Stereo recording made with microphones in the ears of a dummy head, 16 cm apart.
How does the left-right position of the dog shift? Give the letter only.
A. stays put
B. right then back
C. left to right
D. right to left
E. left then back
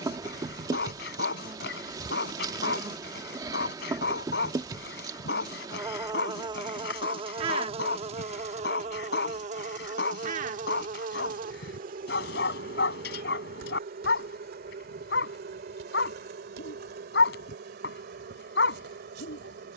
A.